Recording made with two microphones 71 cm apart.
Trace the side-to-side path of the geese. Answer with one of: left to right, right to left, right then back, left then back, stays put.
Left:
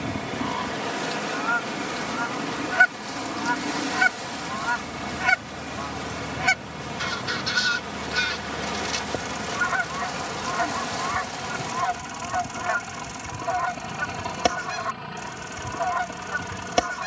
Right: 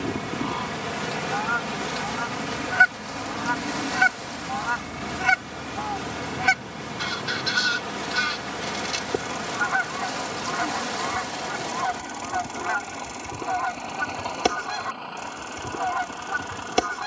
stays put.